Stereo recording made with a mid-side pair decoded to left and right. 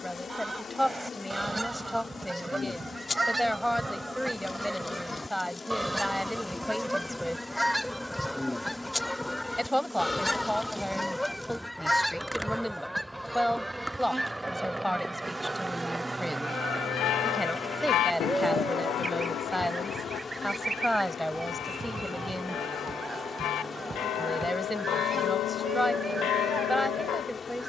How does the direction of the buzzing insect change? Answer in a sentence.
You can hear the buzzing insect go right and come back.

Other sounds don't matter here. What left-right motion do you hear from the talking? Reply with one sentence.
In this clip you hear the talking stay put.